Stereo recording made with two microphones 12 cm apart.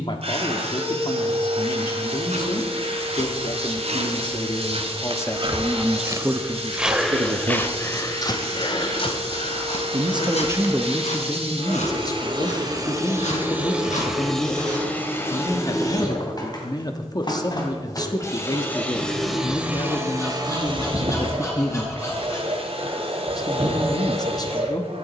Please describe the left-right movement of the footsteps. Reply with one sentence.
You can hear the footsteps move to the left.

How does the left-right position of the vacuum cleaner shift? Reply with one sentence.
You can hear the vacuum cleaner move from right to left and back again.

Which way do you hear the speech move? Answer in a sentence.
In this clip you hear the speech go right and come back.